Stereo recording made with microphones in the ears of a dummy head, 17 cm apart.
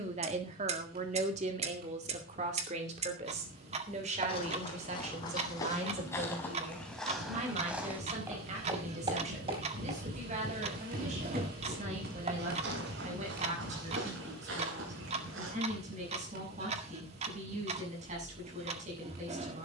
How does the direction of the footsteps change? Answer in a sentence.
In this clip you hear the footsteps travel towards the right.